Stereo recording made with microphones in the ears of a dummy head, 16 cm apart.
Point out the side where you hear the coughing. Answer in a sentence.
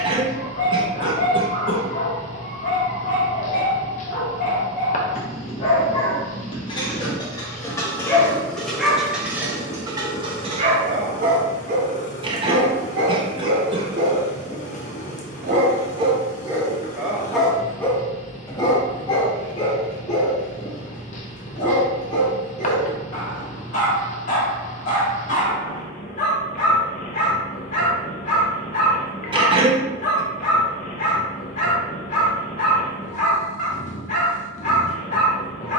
You can hear the coughing on the right.